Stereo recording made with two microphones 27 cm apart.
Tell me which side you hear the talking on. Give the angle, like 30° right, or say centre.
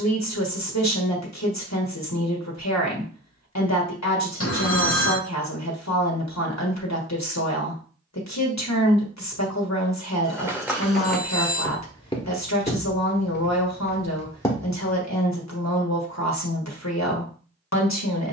80° left.